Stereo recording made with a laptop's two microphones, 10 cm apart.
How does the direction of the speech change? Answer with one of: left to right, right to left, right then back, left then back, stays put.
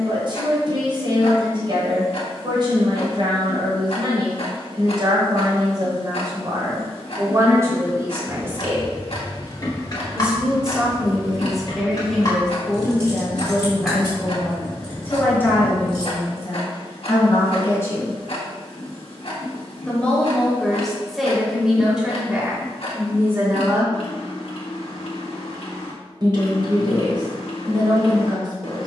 left then back.